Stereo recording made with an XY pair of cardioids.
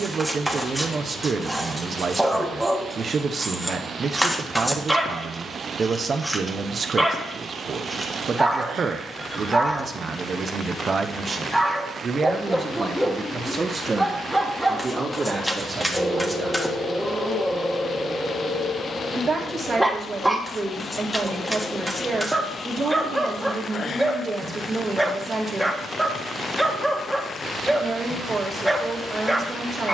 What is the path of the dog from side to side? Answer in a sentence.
In this clip you hear the dog stay put.